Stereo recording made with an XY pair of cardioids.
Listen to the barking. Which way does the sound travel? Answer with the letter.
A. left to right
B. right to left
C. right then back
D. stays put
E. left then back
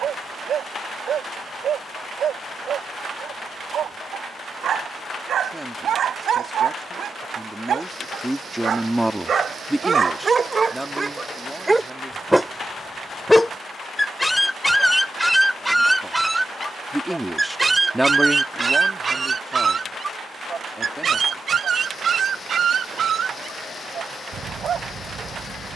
E.